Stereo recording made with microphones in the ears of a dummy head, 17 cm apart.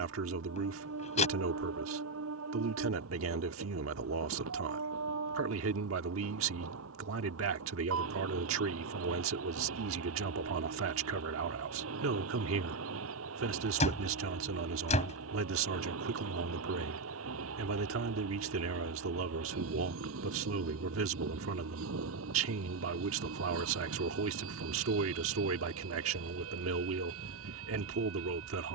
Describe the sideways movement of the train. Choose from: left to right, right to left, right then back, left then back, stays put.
stays put.